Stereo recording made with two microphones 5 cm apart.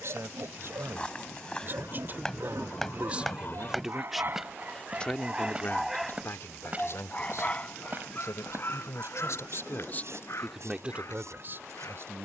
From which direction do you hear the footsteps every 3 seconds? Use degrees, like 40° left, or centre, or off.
20° left, 10° right, 30° right, 60° right.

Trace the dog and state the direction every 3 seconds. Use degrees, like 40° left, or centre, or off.
70° right, 30° right, 30° left, 50° left.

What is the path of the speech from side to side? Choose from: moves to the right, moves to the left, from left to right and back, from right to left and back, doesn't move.
from right to left and back.